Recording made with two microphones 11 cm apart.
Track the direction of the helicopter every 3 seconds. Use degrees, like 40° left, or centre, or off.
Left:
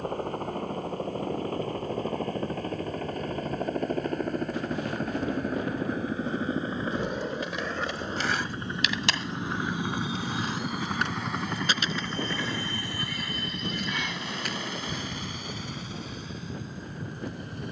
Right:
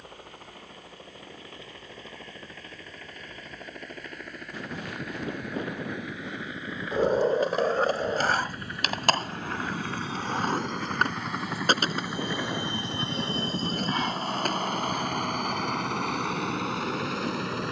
50° left, 40° left, 30° left, 10° left, 30° right, 60° right.